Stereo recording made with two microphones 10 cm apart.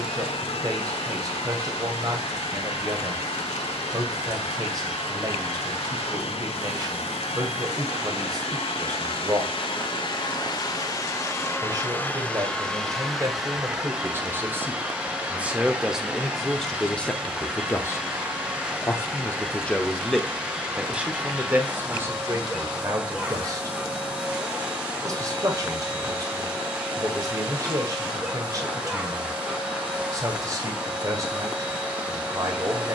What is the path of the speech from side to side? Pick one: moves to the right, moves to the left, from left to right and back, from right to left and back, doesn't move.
from right to left and back.